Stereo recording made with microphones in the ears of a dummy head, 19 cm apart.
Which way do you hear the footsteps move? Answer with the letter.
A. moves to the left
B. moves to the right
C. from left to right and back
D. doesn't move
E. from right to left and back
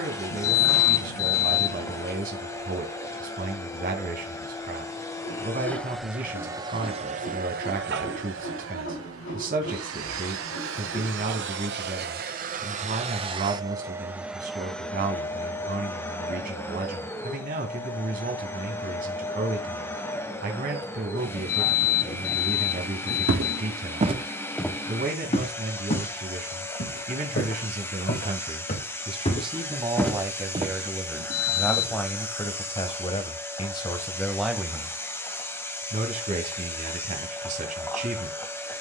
E.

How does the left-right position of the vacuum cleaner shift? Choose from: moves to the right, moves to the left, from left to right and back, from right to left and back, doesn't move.
from left to right and back.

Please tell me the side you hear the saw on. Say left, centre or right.
left.